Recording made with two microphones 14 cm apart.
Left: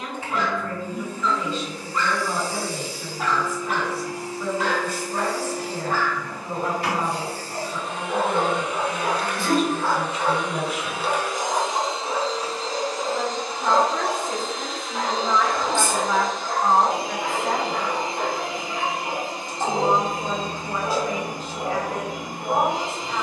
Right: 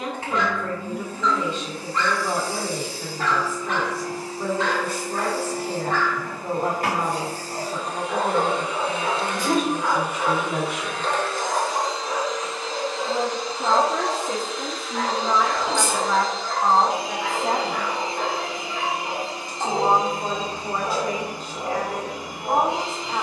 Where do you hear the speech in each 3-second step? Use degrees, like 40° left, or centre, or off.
60° right, 60° right, 60° right, 60° right, 50° right, 10° right, 60° right, 60° right.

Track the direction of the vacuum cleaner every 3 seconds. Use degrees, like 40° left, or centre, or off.
60° right, 60° right, 40° right, centre, 40° left, 50° left, 50° left, 50° left.